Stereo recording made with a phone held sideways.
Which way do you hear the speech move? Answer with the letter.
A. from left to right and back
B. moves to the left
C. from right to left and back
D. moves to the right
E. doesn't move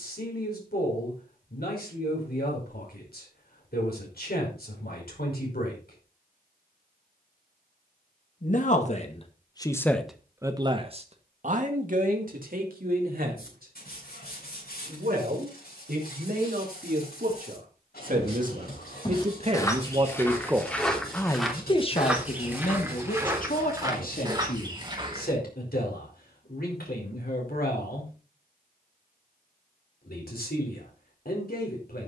A.